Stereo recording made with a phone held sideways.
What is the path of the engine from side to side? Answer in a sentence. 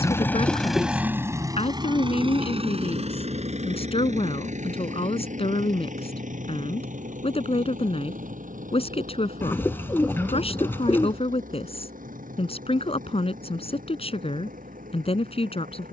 You can hear the engine move to the right.